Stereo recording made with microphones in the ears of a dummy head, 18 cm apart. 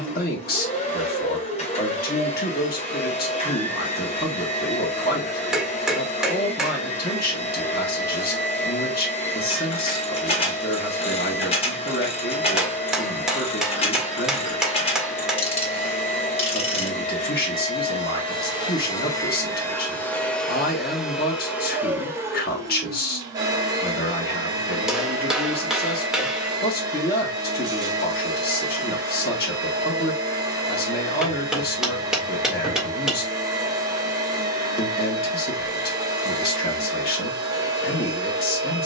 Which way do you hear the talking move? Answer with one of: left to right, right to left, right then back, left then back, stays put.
stays put.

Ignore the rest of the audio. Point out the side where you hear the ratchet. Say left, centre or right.
left.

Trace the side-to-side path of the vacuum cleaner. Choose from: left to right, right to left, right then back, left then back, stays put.
left to right.